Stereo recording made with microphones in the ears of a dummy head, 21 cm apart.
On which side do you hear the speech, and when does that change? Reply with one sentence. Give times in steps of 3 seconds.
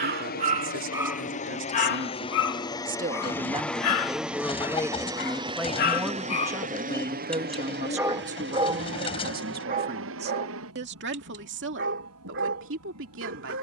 In this clip you hear the speech on the right from 0 s, in the centre from 3 s and on the right from 6 s.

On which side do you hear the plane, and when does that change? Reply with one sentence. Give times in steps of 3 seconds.
In this clip you hear the plane on the left from 0 s, in the centre from 3 s and on the right from 6 s.